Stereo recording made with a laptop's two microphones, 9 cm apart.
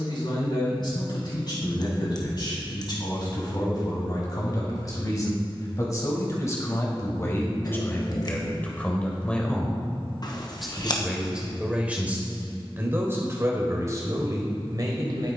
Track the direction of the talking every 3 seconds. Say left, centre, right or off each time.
left, left, left, centre, right.